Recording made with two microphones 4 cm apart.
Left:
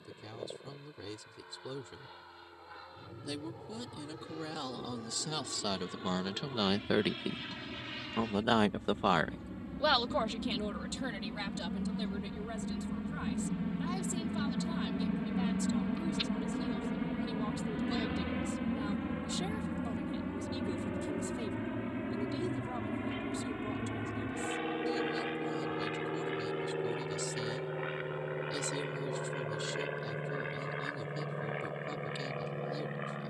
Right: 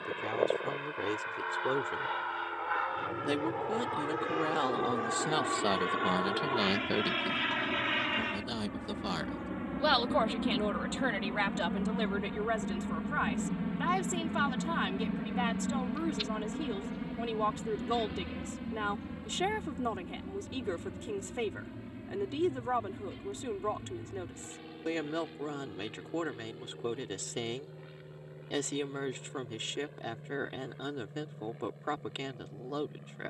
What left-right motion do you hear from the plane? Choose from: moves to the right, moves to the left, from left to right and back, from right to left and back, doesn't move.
moves to the left.